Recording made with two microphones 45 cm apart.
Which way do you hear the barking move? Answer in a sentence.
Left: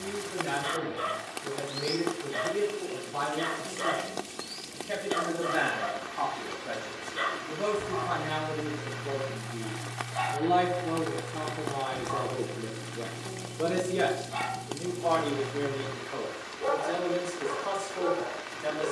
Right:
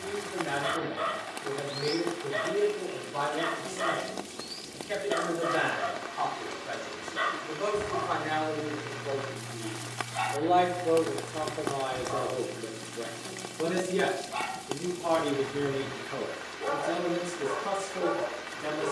In this clip you hear the barking go left and come back.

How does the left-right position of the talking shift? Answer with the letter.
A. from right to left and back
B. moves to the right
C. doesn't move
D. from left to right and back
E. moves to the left
B.